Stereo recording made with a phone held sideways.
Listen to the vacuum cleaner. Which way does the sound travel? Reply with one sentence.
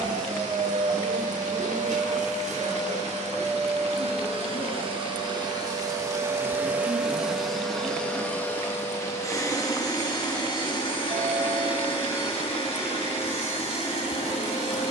In this clip you hear the vacuum cleaner go from the right side to the left.